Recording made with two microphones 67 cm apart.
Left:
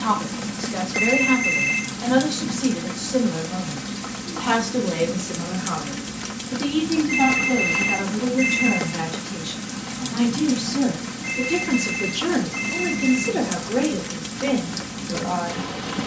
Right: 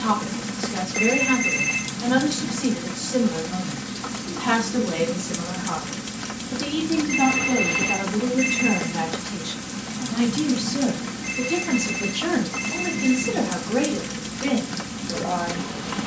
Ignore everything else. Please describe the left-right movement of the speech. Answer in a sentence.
You can hear the speech go left and come back.